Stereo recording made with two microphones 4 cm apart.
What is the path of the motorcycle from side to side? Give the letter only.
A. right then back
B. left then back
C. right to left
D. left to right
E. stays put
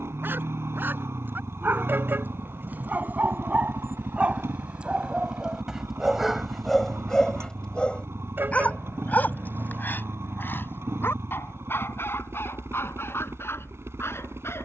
E.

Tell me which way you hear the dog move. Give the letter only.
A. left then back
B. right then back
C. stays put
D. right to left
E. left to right
D.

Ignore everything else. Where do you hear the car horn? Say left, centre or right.
right.